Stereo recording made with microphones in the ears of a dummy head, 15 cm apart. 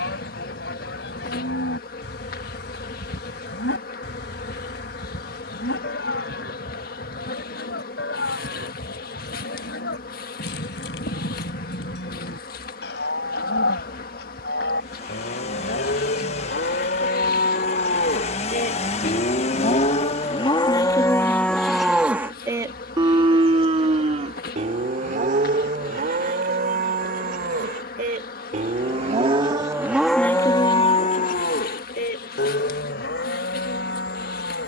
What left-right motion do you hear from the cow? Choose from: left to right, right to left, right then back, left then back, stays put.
right then back.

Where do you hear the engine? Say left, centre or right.
left.